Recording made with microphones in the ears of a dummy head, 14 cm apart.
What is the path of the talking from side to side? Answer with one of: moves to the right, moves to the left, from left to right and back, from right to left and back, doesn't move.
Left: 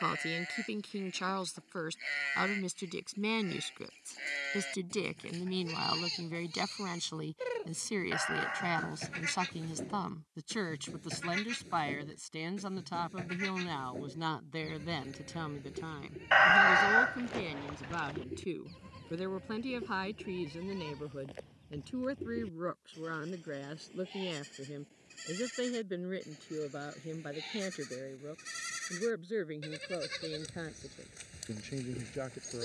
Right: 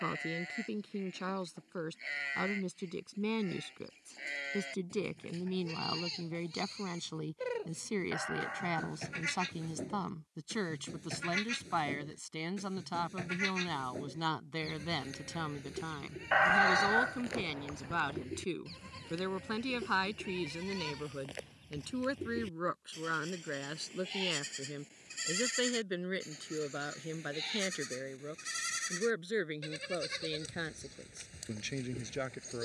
moves to the right.